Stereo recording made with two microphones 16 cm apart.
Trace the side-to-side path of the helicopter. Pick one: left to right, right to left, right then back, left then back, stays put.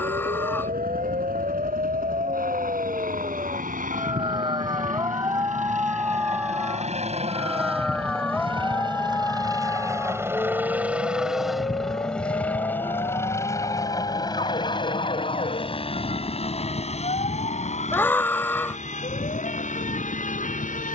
right to left.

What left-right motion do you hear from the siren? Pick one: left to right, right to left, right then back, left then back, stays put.
right to left.